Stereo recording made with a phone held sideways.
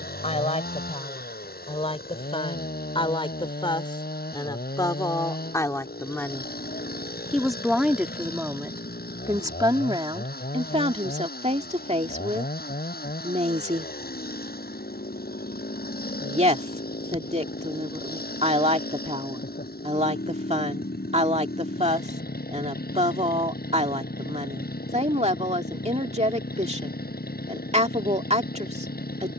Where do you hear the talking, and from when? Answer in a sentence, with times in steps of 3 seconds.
In this clip you hear the talking on the left from 0 s, in the centre from 6 s and on the right from 9 s.